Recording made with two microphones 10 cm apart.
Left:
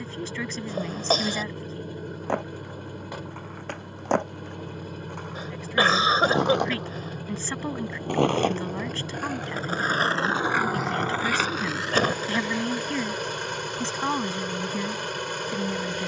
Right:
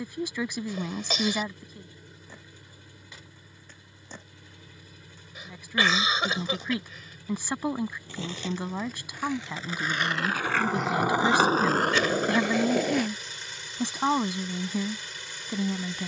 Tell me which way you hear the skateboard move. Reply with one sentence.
You can hear the skateboard move to the right.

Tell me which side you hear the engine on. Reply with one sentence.
You can hear the engine on the left.